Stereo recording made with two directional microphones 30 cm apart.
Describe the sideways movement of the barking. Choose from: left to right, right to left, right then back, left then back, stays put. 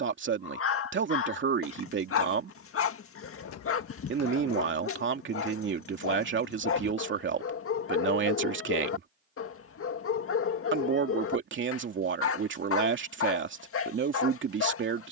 stays put.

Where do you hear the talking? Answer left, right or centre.
right.